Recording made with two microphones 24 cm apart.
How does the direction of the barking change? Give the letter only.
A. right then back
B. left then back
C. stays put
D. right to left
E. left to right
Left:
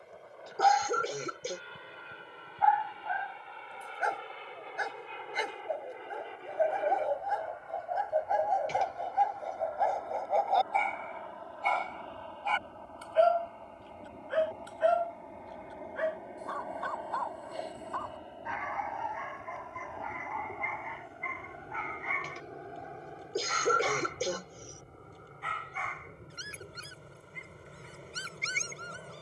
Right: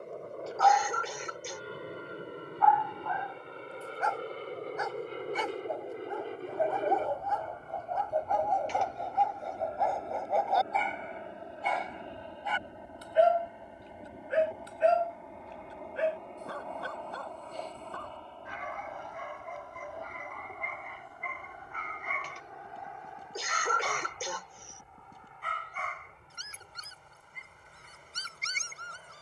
E.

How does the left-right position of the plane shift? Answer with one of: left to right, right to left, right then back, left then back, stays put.
right to left.